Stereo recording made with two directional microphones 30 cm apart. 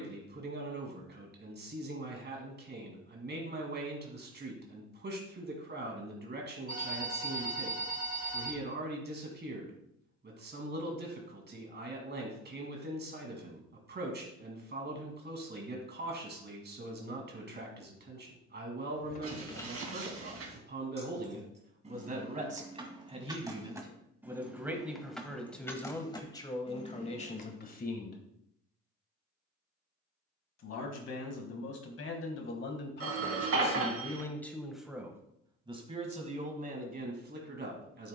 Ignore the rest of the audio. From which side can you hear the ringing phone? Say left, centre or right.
right.